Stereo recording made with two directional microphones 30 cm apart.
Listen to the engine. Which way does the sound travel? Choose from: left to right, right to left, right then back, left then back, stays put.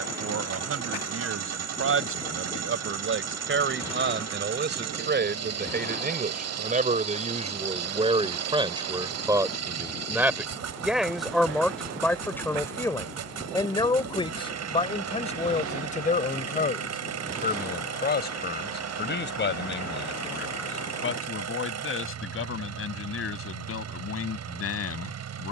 stays put.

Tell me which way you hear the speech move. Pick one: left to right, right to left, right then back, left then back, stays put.
right to left.